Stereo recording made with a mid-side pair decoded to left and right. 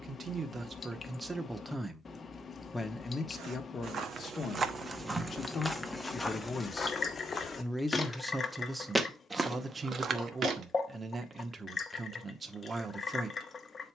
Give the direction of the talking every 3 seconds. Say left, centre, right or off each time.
centre, left, centre, right, right.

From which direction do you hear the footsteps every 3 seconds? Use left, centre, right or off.
off, right, left, right, off.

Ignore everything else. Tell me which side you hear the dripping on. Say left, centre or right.
left.